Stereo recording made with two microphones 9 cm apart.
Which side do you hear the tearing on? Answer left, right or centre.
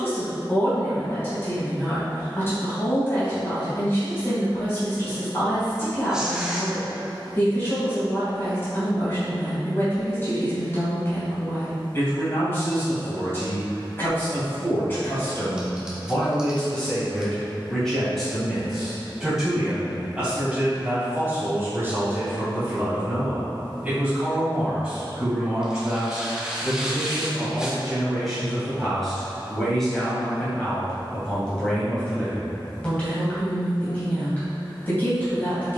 centre.